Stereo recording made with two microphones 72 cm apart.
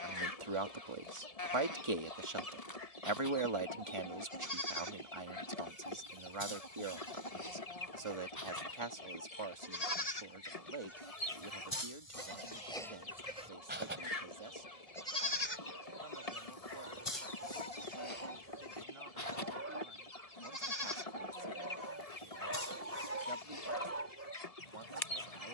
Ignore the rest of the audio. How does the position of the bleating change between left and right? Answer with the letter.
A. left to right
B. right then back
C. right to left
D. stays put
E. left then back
B.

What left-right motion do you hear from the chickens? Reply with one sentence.
You can hear the chickens stay put.